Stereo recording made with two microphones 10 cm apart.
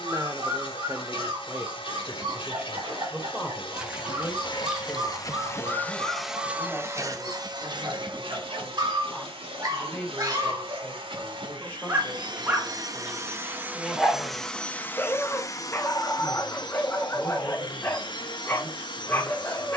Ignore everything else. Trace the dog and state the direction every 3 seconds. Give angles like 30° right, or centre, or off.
60° right, 60° right, 50° right, 40° right, 10° right, 20° left, 20° left.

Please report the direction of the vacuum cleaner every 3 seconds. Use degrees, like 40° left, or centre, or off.
60° left, 50° left, 40° right, 60° right, 20° right, 50° left, 50° left.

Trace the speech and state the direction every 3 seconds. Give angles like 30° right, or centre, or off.
20° right, centre, 10° left, 10° left, 10° left, 10° left, 10° left.